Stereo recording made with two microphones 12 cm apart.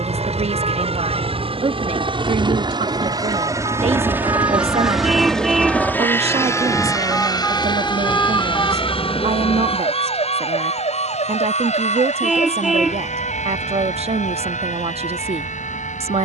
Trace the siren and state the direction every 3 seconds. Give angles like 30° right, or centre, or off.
50° right, 30° right, 10° left, 50° left, 70° left, 80° left.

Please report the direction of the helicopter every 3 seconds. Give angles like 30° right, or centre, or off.
50° right, 10° right, 30° left, 50° left, 60° left, 70° left.